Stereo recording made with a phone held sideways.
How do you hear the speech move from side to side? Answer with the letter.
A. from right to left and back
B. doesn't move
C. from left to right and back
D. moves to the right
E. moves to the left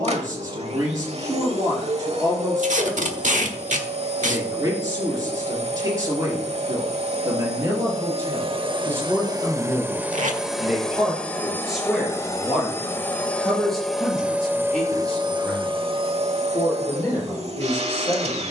E.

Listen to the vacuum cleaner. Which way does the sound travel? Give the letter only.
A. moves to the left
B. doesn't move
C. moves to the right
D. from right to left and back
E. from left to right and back
D.